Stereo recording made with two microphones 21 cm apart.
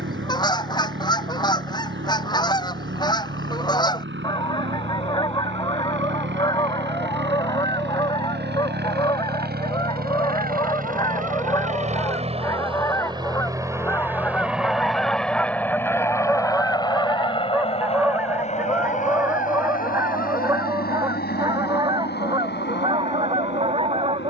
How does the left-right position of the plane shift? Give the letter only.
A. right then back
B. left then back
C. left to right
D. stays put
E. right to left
E.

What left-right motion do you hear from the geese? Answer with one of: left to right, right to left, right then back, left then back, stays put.
left to right.